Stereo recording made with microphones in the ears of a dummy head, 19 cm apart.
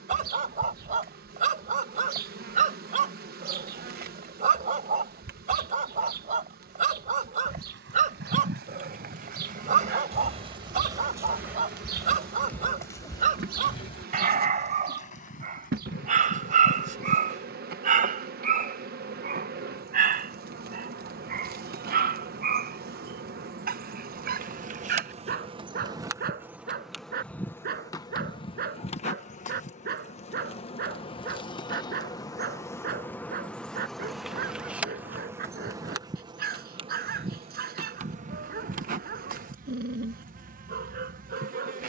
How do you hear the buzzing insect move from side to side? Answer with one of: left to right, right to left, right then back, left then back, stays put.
left then back.